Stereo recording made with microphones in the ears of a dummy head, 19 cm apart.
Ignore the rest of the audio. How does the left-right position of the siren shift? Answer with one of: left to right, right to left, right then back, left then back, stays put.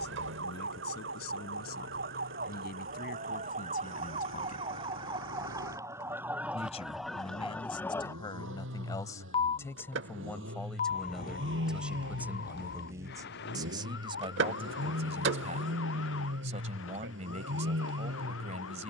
right to left.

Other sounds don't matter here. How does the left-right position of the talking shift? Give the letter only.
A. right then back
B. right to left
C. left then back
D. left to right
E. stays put
D.